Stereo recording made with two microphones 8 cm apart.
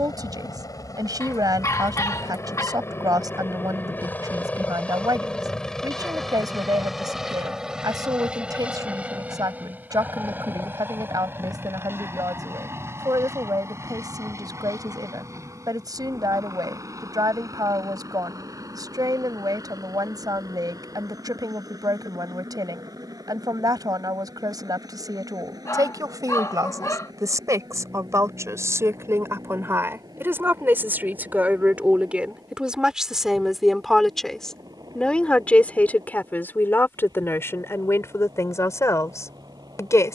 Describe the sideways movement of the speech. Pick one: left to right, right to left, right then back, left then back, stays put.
right to left.